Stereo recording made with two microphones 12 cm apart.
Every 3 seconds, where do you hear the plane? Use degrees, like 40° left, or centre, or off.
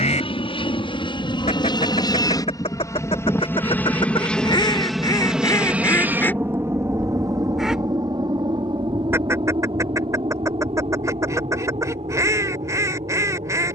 40° left, 10° left, 30° right, 40° right, 50° right.